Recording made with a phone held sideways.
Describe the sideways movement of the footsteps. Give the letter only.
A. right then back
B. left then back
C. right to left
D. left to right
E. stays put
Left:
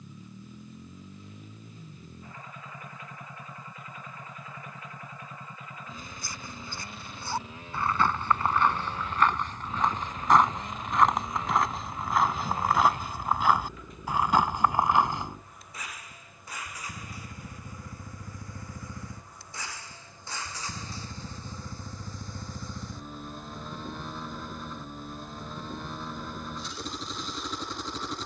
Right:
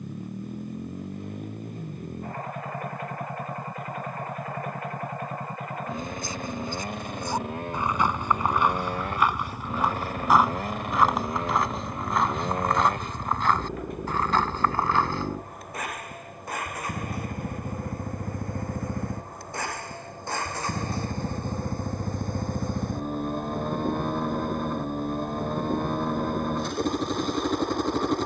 C.